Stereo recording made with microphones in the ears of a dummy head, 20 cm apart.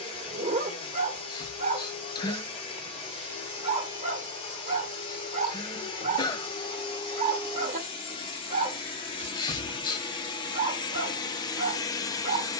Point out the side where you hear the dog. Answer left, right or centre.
right.